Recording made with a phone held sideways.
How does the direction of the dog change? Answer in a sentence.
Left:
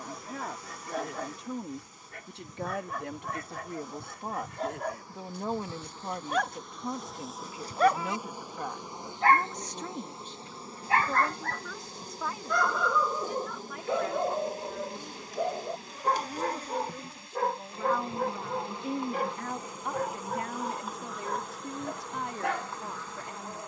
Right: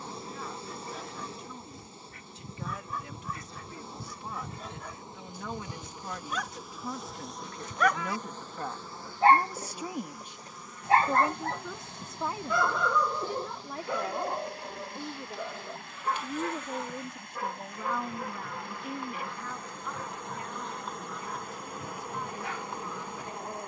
You can hear the dog move from left to right and back again.